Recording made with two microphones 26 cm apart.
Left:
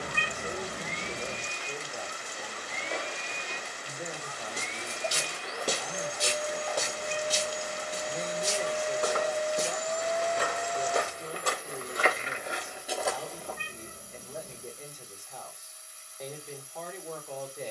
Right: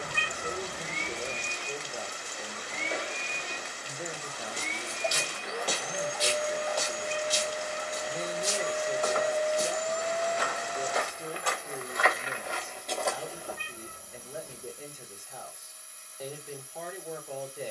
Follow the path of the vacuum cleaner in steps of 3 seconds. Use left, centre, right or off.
right, right, centre, right, right, right.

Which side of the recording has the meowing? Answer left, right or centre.
left.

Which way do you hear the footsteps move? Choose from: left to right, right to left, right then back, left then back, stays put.
left then back.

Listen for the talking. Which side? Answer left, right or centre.
centre.